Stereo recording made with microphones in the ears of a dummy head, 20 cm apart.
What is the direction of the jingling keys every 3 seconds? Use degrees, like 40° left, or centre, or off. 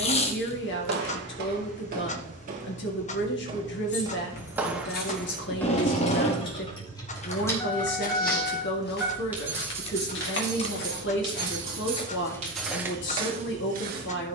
off, 40° left, 10° left, 20° right, 30° right.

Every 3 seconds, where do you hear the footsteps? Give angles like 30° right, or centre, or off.
40° right, 10° right, 40° left, 50° left, 20° right.